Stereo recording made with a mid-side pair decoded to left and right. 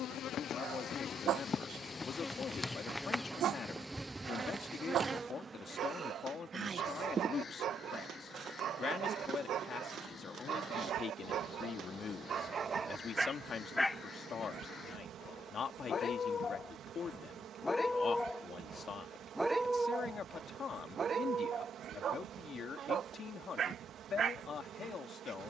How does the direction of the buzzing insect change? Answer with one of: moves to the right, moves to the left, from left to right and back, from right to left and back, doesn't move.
moves to the right.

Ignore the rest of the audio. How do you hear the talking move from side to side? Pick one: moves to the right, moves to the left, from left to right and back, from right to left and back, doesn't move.
doesn't move.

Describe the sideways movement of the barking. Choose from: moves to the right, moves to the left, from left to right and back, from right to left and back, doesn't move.
from right to left and back.